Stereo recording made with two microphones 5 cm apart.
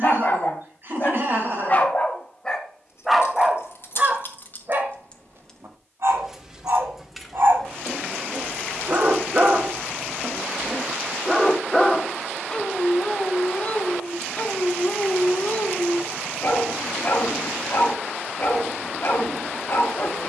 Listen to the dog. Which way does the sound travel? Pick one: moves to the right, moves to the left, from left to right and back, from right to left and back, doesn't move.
from left to right and back.